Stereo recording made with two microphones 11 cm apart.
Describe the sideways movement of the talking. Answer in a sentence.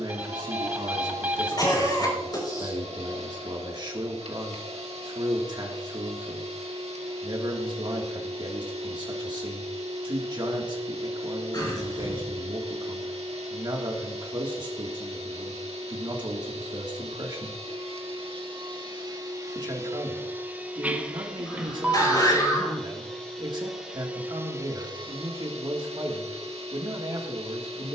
In this clip you hear the talking stay in one place.